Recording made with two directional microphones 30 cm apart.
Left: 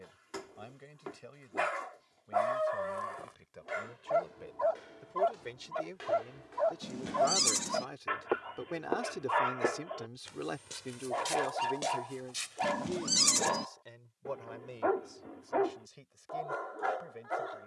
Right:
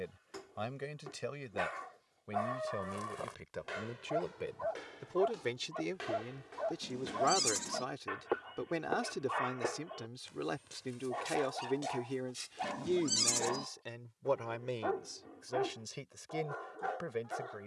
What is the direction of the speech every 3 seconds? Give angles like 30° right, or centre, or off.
70° right, 50° right, 30° right, centre, 40° right, 60° right.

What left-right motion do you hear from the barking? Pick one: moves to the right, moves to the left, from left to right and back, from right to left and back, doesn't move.
doesn't move.